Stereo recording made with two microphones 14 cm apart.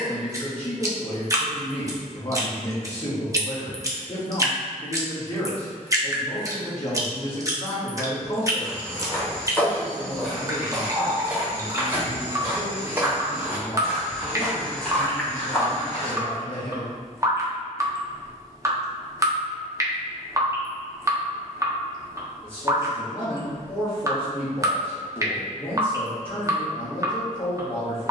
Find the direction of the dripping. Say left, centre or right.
right.